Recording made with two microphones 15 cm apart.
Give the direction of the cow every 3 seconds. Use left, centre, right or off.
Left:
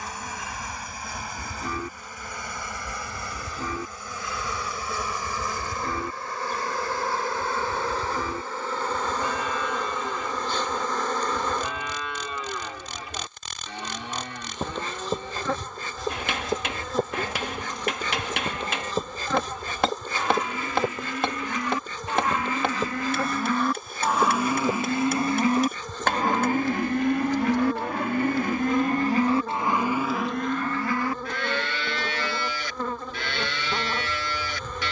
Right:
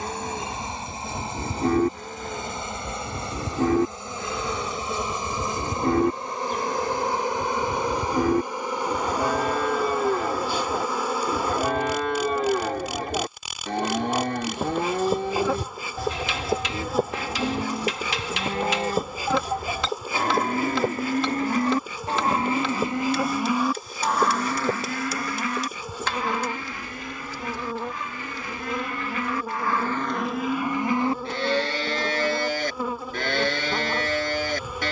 right, right, right, right, right, right, right, right, left, left, right, right.